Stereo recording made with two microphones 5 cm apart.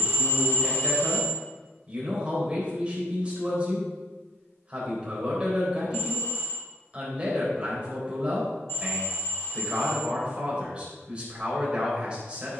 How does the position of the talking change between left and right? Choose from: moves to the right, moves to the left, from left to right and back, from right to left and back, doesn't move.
doesn't move.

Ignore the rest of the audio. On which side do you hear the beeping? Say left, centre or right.
left.